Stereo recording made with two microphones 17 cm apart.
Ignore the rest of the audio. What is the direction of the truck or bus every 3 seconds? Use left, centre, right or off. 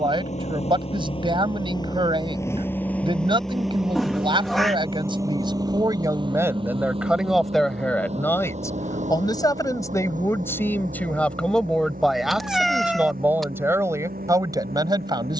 left, centre, right, right, right.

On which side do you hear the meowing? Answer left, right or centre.
centre.